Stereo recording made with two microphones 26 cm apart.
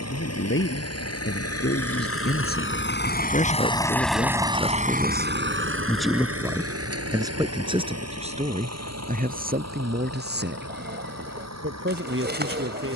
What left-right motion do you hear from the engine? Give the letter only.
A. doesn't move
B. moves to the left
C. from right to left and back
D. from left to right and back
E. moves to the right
E.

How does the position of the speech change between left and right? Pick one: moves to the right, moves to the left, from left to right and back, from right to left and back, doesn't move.
moves to the right.